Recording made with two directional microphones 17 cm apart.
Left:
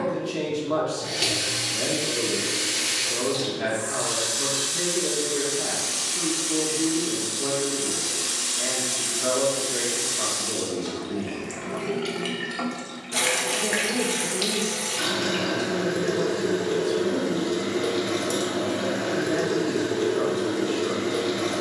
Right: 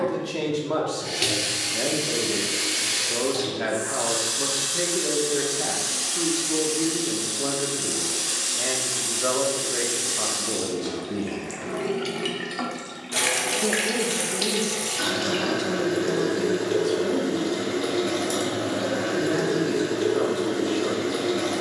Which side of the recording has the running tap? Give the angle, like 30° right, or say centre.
10° right.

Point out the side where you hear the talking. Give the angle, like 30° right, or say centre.
20° right.